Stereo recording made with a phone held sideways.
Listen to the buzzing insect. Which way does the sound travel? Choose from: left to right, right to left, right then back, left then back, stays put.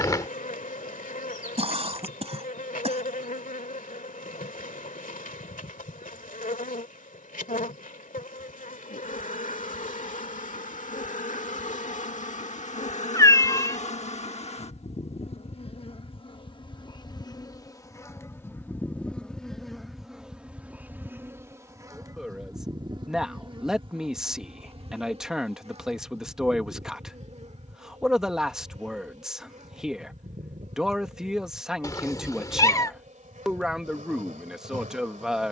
left to right.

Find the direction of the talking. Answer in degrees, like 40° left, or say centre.
centre.